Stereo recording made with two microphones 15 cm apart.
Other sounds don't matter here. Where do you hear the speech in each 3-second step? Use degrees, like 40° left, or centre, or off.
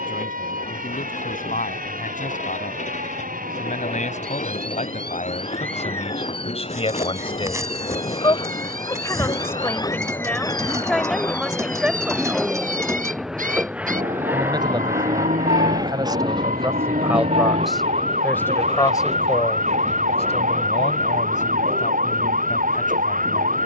70° left, 60° left, 40° left, 10° left, 20° right, 20° right, 30° left, 60° left.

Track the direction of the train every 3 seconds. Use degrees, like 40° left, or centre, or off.
60° left, 50° left, 40° left, 20° left, 10° right, 30° right, 50° right, 60° right.